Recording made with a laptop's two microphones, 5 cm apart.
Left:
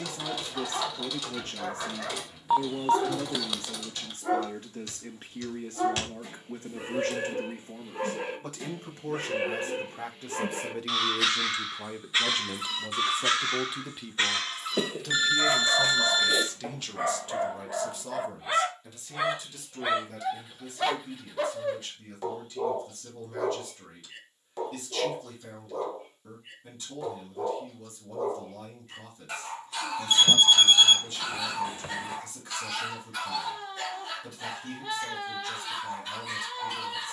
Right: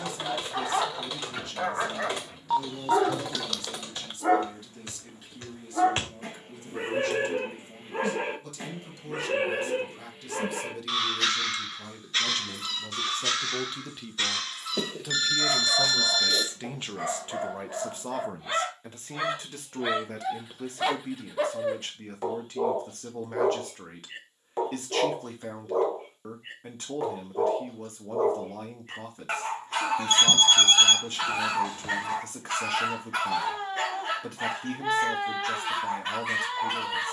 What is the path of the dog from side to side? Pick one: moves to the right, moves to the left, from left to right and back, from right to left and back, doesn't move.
from right to left and back.